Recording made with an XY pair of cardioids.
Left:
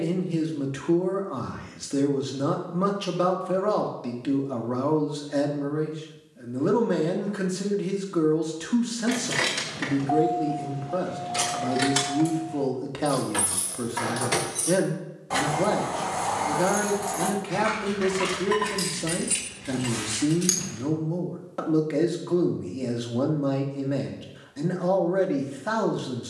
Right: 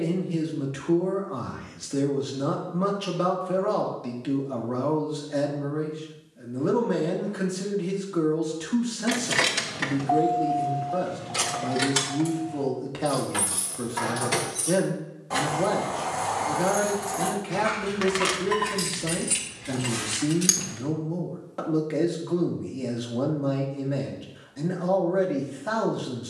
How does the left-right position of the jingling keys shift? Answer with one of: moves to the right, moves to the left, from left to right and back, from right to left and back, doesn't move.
from right to left and back.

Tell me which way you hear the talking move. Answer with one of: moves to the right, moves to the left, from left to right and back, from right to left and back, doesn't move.
doesn't move.